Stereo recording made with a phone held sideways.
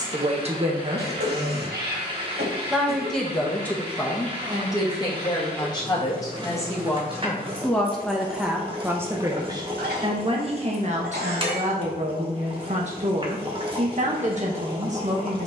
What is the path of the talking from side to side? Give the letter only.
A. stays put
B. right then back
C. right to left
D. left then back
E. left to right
D.